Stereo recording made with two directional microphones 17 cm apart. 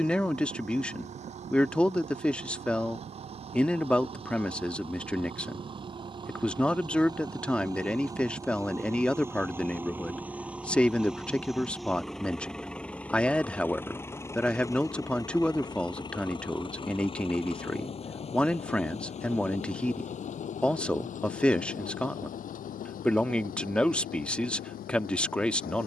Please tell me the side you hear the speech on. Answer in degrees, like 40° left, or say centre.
10° left.